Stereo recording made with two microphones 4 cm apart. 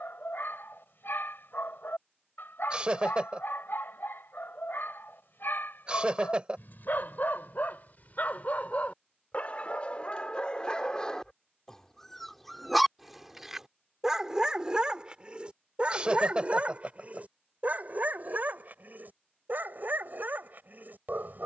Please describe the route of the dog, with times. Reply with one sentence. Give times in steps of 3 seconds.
In this clip you hear the dog on the left from 0 s, in the centre from 12 s and on the right from 15 s.